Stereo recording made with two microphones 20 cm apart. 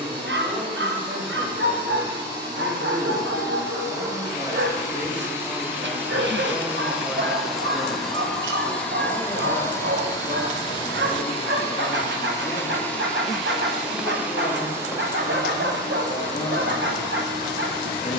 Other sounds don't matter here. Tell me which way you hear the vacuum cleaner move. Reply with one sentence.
In this clip you hear the vacuum cleaner go left and come back.